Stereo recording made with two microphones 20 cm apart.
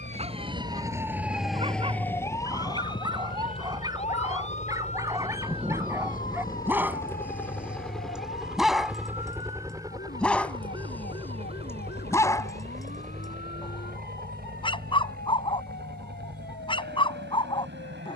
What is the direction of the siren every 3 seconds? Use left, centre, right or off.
centre, left, left, left, left, left.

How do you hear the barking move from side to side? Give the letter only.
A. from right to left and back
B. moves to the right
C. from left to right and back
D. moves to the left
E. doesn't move
D.